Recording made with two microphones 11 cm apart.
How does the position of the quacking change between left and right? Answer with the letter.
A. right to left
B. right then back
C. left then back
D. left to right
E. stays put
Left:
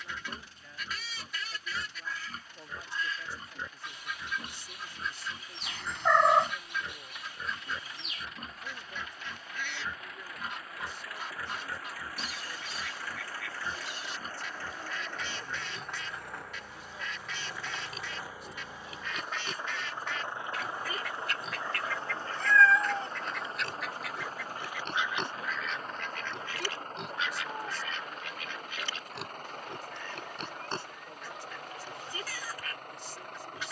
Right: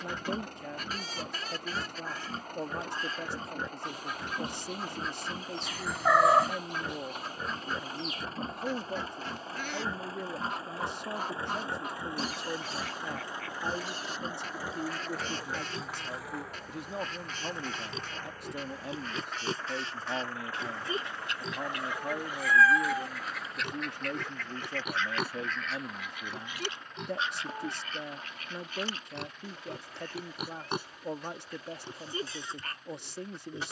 C.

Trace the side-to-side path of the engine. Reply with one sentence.
You can hear the engine go from the right side to the left.